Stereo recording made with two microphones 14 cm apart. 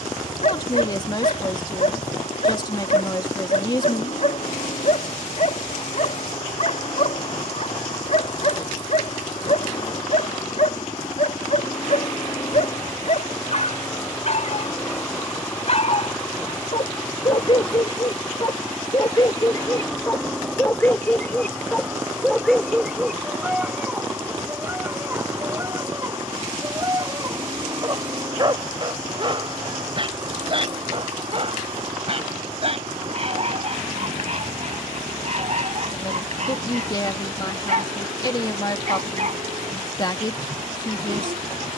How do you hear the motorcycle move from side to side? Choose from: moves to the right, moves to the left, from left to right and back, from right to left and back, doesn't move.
moves to the right.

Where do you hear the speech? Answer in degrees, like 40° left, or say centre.
30° left.